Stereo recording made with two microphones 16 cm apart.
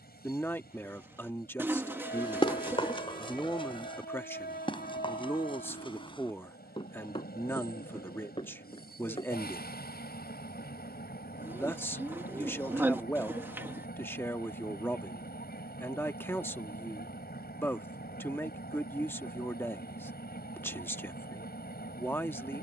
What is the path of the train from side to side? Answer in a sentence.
In this clip you hear the train stay in one place.